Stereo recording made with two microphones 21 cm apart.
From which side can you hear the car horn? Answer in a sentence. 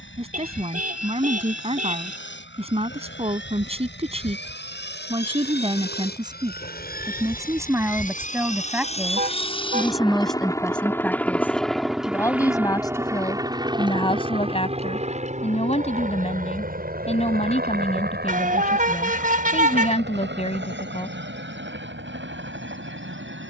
In this clip you hear the car horn on the right.